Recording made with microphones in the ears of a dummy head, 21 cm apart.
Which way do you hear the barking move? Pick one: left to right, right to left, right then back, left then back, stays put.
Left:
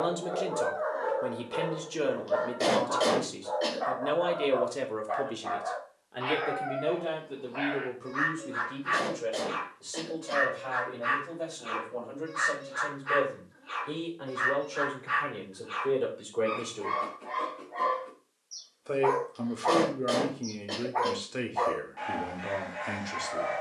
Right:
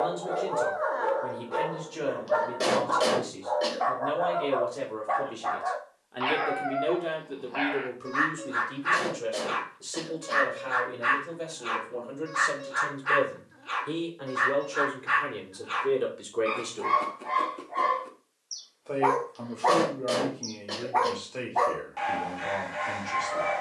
stays put.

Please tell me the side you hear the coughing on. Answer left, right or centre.
centre.